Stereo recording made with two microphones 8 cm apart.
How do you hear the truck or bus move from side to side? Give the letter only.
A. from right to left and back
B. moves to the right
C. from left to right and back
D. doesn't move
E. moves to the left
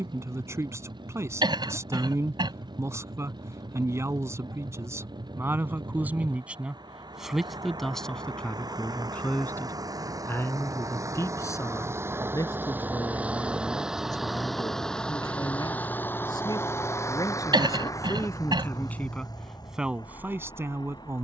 E.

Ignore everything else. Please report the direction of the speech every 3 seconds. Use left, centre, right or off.
right, right, centre, left, left, left, centre.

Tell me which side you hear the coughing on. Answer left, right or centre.
right.